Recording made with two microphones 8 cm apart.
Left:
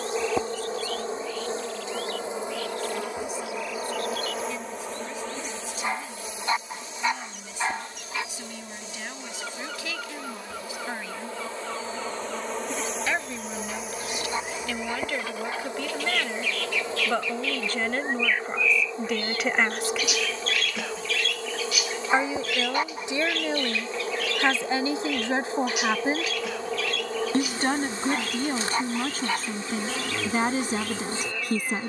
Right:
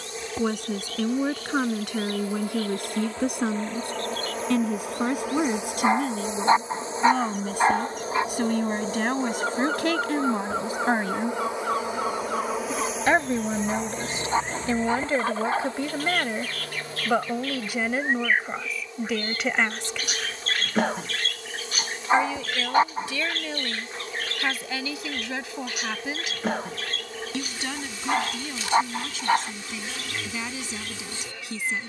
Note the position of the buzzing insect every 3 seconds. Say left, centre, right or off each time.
left, centre, right, right, centre, left, left, left, left, left, left.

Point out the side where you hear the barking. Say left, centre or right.
right.